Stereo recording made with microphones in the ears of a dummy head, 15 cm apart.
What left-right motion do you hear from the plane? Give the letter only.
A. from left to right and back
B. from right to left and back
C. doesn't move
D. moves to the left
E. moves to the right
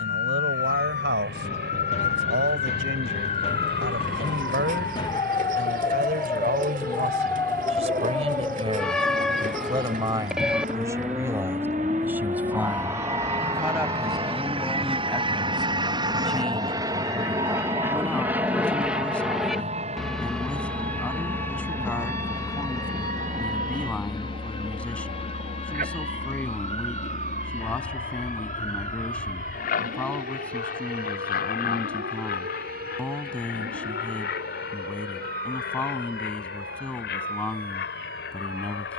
D.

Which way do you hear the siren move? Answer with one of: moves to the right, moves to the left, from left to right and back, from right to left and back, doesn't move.
moves to the right.